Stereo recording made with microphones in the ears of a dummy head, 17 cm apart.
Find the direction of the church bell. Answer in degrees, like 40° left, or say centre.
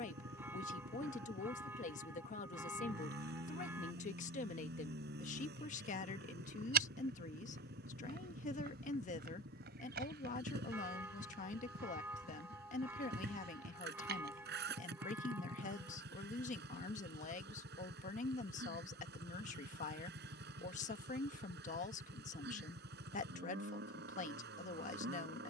10° right.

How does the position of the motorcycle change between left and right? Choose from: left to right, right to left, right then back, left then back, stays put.
stays put.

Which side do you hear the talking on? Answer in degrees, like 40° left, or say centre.
40° left.